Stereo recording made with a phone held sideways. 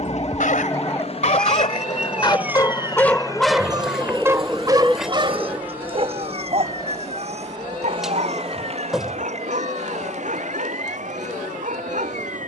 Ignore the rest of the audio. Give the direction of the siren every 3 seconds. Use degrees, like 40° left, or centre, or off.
10° left, 30° right, 40° right, 50° right.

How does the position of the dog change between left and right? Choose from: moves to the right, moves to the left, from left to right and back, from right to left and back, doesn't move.
moves to the right.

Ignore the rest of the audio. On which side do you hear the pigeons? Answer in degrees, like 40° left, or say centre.
centre.